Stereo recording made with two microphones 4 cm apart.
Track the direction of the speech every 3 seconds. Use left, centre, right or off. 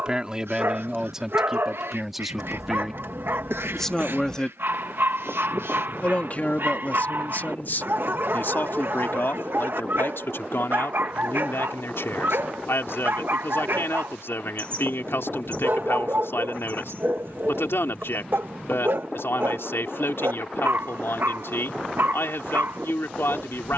centre, centre, left, left, left, left, left, left.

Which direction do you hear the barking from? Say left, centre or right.
right.